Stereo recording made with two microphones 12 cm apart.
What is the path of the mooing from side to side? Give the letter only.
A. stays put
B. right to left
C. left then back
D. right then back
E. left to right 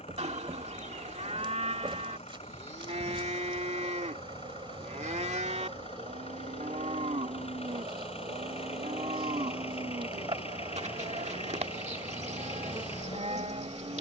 A.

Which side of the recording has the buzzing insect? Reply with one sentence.
In this clip you hear the buzzing insect on the right.